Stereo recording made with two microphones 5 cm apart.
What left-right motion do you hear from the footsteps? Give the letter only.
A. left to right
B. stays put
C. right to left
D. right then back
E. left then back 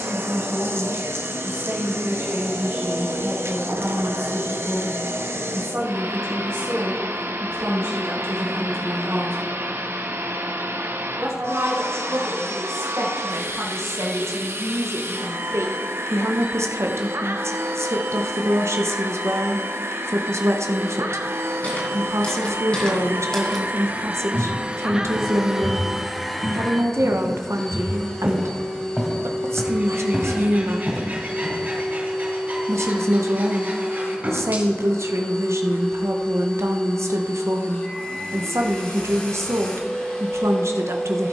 D.